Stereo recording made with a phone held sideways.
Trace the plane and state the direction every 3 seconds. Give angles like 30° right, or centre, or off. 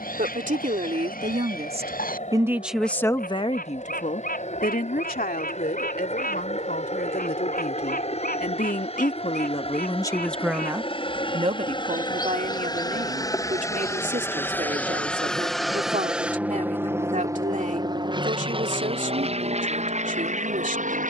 60° left, 60° left, 50° left, 40° left, 20° left, 10° right, 40° right.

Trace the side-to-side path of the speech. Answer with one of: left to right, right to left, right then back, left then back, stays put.
left then back.